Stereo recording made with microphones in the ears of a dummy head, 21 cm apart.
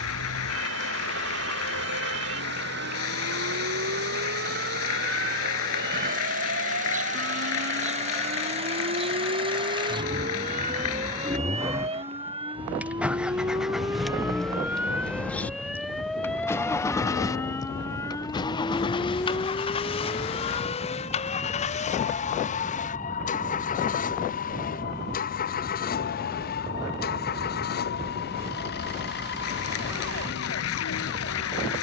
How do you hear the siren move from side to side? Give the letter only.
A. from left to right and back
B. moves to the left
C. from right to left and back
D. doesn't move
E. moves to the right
B.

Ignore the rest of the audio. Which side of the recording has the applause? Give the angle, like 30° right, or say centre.
70° left.